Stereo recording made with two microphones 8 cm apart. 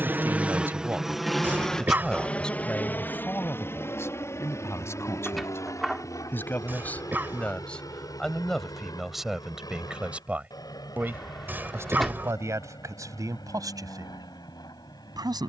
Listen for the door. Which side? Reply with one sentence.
You can hear the door in the centre.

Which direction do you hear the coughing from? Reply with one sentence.
You can hear the coughing on the right.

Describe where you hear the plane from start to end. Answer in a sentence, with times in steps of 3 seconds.
In this clip you hear the plane in the centre from 0 s and on the left from 3 s.